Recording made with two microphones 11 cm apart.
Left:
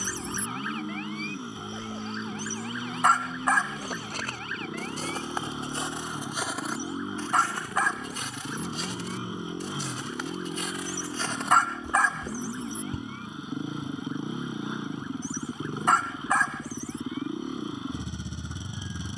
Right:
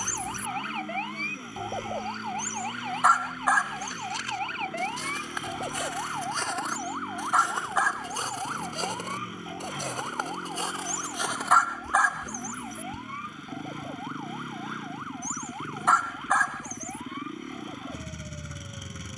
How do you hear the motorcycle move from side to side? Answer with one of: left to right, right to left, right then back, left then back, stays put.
stays put.